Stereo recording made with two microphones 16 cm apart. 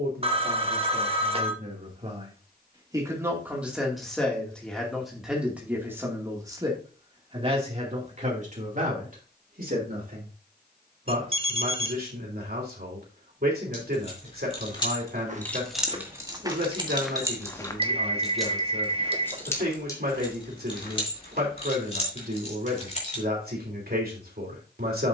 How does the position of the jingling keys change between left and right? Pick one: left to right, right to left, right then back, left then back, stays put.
right then back.